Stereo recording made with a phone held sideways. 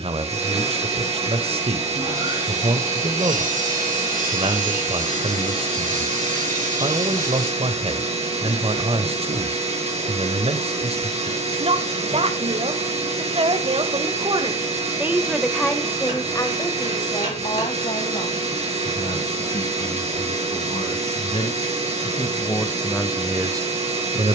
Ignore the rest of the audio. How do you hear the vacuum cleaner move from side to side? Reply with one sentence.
In this clip you hear the vacuum cleaner stay put.